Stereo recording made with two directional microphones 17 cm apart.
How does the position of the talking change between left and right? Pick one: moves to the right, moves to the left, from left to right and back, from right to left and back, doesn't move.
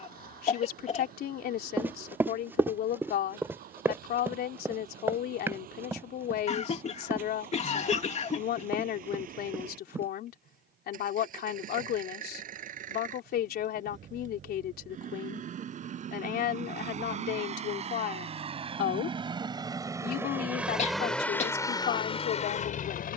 doesn't move.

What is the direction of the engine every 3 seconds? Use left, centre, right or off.
right, right, right, right, right, right, right, left.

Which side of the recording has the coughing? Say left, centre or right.
left.